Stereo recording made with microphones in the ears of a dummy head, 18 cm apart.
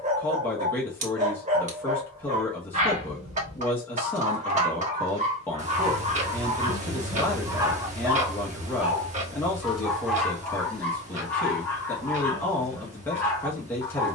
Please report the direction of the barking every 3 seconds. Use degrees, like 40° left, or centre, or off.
40° right, 40° right, 20° right, 10° left, 10° left.